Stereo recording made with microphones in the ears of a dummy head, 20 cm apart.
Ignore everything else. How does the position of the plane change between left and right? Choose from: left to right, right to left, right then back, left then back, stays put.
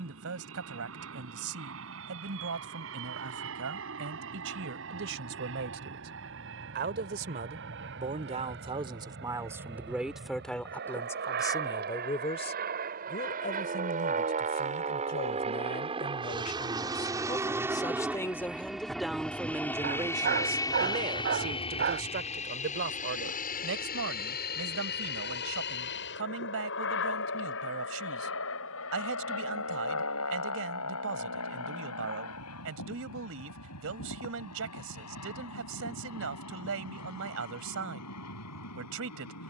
right to left.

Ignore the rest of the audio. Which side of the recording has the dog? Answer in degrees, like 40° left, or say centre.
50° right.